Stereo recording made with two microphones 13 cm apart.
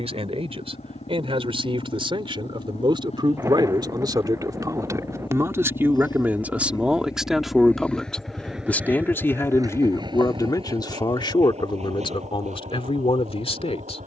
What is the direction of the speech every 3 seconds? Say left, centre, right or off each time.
right, right, centre, left, left.